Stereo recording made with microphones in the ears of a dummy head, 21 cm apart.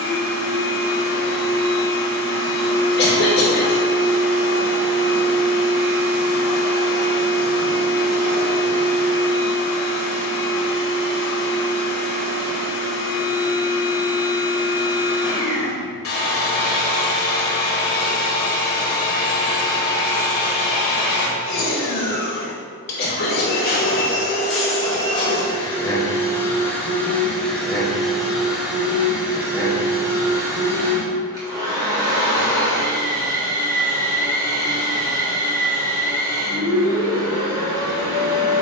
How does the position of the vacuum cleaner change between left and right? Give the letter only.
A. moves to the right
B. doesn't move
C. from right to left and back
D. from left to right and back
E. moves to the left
A.